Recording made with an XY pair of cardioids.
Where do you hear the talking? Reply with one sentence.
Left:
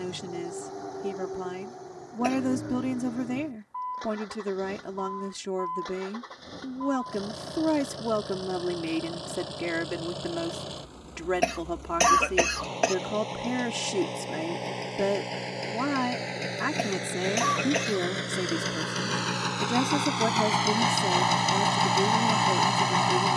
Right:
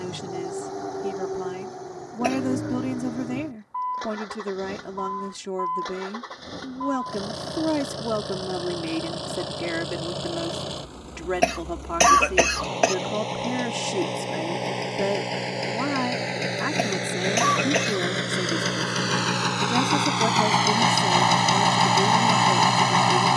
You can hear the talking in the centre.